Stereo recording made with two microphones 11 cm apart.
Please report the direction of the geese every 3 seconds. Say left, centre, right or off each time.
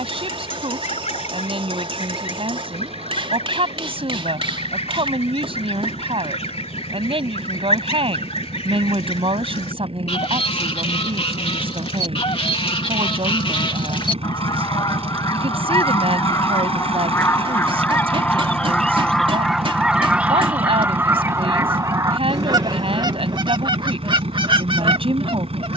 left, left, left, left, left, left, centre, right, right.